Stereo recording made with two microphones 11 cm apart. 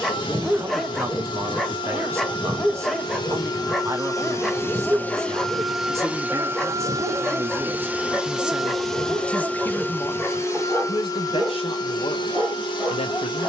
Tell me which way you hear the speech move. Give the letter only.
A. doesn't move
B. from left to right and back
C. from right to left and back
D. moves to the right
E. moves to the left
E.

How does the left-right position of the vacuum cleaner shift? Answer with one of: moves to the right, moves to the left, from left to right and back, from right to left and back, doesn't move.
from left to right and back.